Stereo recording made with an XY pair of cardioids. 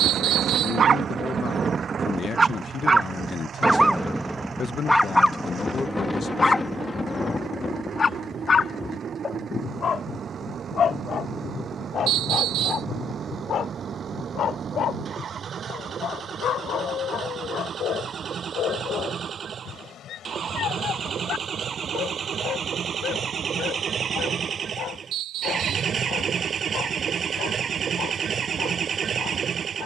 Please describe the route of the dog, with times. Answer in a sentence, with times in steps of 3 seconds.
You can hear the dog on the right from 0 s, in the centre from 3 s and on the left from 6 s.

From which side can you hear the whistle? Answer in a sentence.
You can hear the whistle on the right.